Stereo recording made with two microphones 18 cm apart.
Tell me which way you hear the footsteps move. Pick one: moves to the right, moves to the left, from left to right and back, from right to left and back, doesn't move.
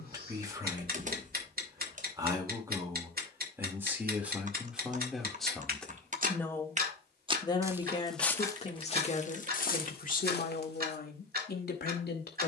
moves to the left.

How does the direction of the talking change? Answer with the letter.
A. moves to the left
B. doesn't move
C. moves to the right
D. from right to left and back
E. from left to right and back
A.